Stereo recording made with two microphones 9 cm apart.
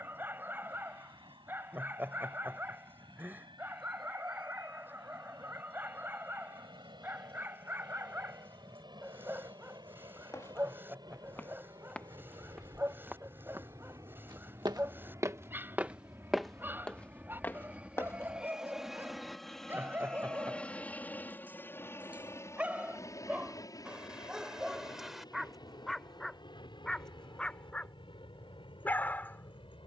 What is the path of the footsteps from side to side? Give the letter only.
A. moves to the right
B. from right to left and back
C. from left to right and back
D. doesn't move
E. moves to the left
C.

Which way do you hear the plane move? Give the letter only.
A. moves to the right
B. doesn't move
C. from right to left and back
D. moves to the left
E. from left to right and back
D.